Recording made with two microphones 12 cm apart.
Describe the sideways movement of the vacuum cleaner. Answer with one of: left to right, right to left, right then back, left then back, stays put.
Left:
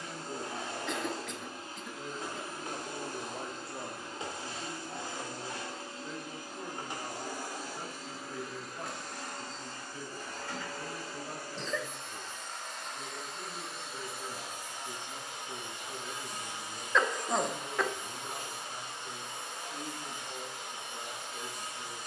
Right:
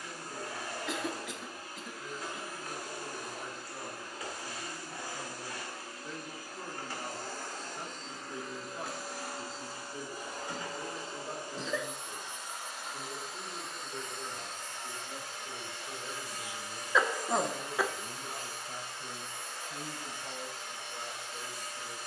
right then back.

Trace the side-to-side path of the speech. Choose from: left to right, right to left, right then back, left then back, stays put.
left to right.